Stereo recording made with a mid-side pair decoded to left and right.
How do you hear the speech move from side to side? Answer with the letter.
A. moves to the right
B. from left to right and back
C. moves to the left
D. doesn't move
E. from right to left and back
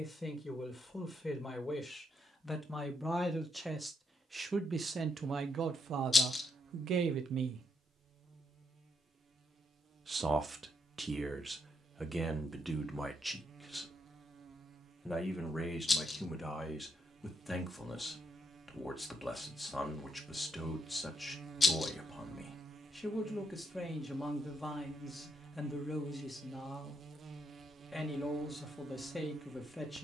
B.